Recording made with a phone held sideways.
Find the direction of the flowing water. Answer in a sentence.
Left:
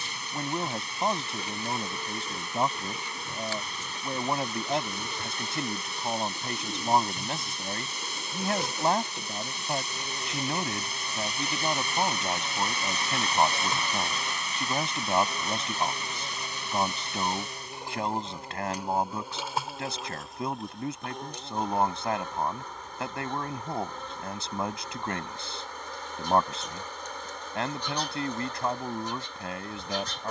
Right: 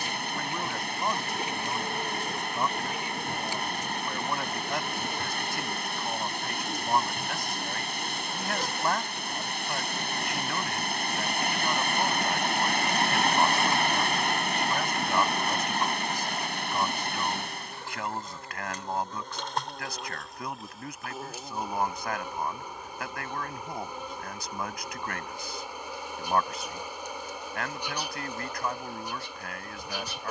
In this clip you hear the flowing water on the right.